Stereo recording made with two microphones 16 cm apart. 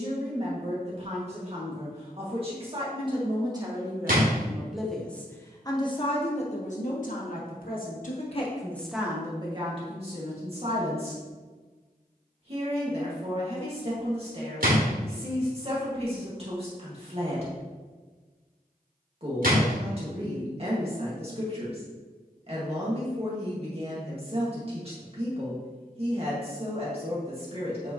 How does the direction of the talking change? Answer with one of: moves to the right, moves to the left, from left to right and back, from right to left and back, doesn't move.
from right to left and back.